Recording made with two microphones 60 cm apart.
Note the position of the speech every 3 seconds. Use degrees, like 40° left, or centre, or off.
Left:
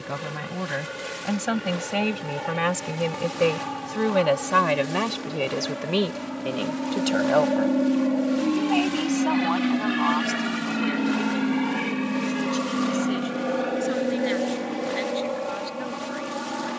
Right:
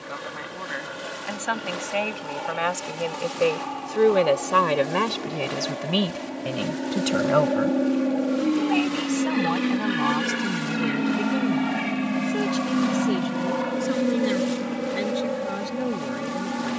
60° left, 10° left, 30° right, 50° right, 60° right, 70° right.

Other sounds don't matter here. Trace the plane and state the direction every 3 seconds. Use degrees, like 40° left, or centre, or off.
50° left, 40° left, 30° left, centre, 20° right, 40° right.